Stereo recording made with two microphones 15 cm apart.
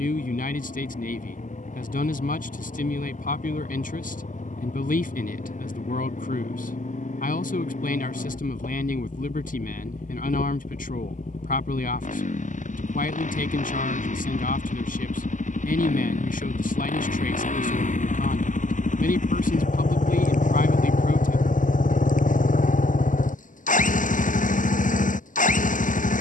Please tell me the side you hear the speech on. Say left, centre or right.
left.